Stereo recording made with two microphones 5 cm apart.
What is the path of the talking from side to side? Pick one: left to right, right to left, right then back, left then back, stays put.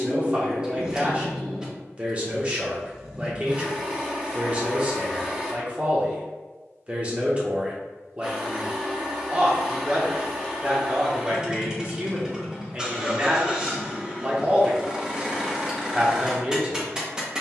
stays put.